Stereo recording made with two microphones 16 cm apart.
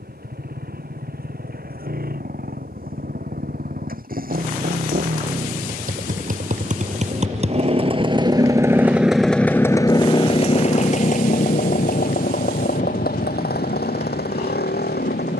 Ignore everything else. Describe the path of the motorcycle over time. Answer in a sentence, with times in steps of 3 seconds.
You can hear the motorcycle on the right from 0 s and on the left from 9 s.